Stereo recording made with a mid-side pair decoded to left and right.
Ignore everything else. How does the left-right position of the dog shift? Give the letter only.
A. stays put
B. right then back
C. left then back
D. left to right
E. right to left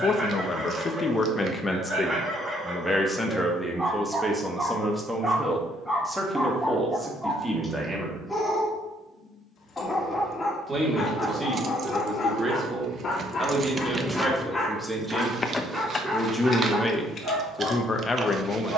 C.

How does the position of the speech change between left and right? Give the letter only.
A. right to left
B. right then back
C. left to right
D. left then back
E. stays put
B.